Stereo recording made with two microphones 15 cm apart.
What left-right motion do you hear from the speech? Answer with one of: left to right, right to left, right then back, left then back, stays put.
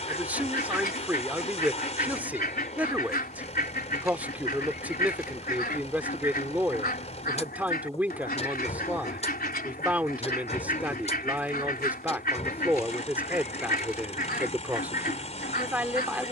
stays put.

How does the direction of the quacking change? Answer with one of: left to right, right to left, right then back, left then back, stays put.
stays put.